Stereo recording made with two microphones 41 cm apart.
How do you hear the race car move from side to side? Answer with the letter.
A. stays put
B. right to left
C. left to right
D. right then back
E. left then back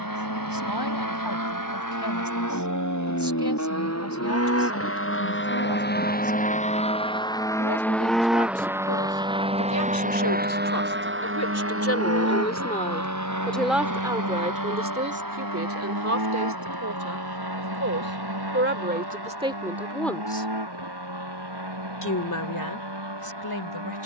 C.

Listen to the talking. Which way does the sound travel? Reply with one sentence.
You can hear the talking move from left to right and back again.